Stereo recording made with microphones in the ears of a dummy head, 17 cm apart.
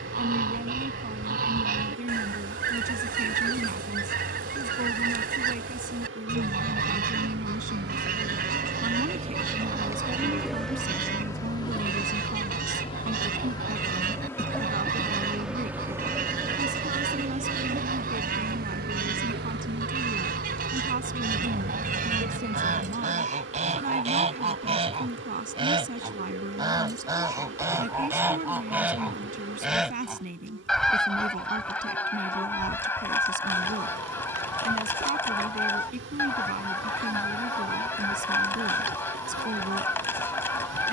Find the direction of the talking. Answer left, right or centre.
right.